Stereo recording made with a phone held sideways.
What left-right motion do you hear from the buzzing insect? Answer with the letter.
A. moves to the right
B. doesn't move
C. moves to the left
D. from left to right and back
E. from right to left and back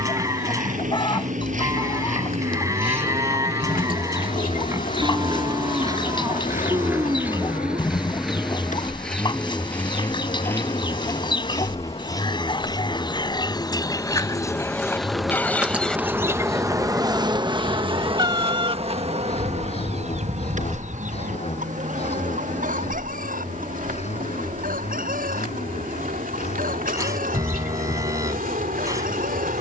A.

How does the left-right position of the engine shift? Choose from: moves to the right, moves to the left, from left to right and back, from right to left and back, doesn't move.
moves to the left.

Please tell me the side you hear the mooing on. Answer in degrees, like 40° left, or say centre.
20° right.